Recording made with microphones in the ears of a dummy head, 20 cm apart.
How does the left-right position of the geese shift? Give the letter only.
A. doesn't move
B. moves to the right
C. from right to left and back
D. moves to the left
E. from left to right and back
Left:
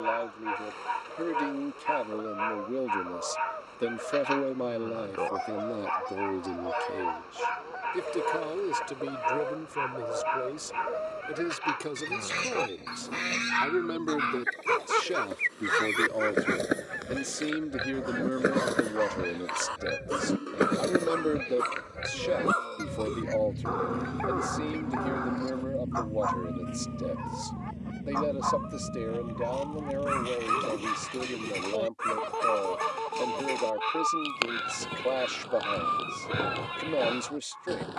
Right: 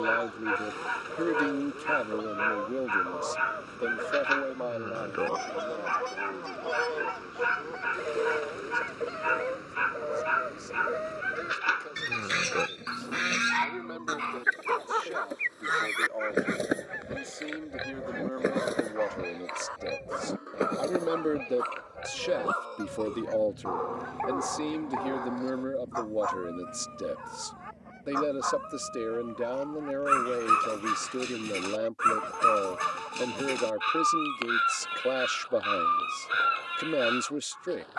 D.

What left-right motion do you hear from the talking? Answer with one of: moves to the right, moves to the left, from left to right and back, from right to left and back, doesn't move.
from right to left and back.